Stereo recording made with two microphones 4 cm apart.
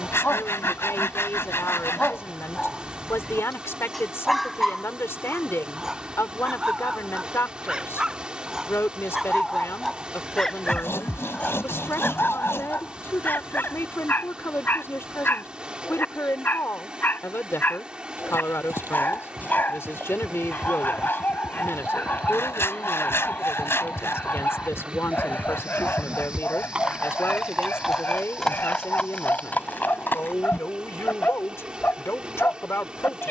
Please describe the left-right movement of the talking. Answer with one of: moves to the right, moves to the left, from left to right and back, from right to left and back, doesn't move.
doesn't move.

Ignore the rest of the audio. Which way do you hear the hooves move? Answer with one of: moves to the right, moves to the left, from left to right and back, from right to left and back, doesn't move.
moves to the left.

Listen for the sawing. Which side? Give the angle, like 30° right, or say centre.
70° left.